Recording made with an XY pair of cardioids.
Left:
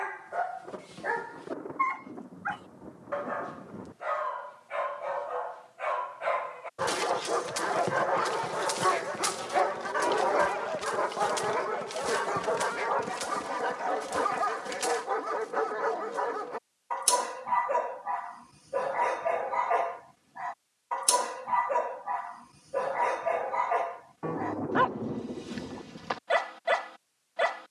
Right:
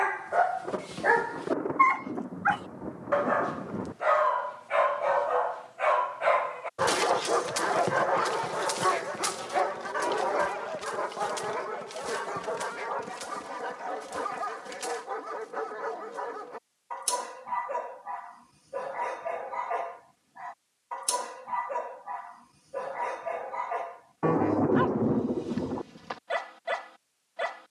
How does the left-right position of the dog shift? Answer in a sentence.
You can hear the dog travel towards the left.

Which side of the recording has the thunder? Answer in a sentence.
You can hear the thunder on the right.